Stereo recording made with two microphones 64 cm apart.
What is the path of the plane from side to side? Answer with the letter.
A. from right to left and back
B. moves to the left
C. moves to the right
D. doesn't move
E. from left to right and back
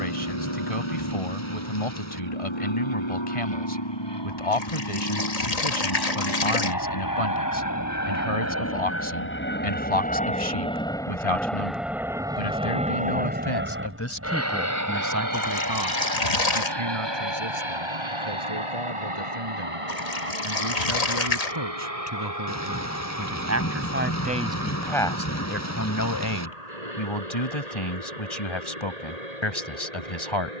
C.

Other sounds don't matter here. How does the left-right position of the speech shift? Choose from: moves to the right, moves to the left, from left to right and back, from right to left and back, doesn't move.
from left to right and back.